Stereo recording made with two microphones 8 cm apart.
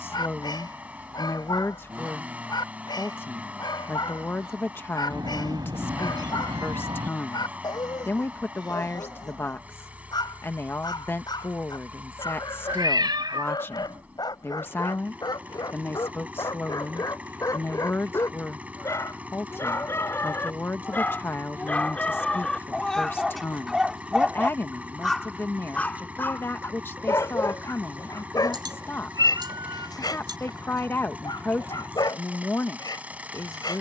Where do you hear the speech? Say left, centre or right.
left.